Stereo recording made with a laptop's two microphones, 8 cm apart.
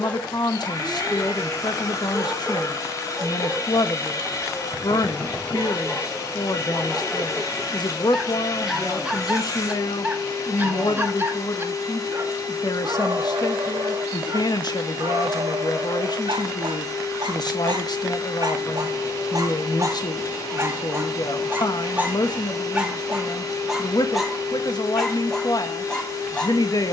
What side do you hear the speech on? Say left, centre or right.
left.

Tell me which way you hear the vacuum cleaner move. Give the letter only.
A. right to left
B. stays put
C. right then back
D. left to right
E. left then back
B.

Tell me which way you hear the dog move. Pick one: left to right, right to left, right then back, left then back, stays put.
right then back.